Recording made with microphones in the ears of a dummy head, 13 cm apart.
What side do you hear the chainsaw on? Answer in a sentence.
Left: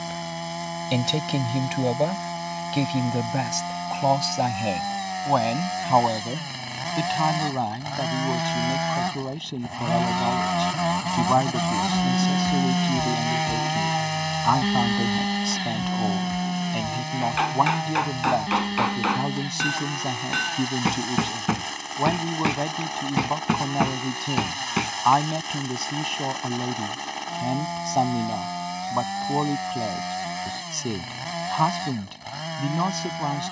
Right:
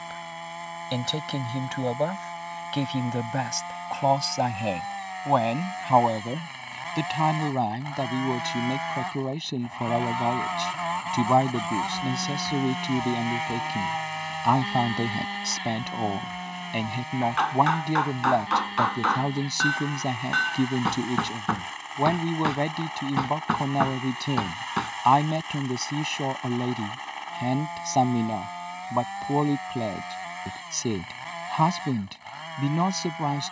In this clip you hear the chainsaw on the left.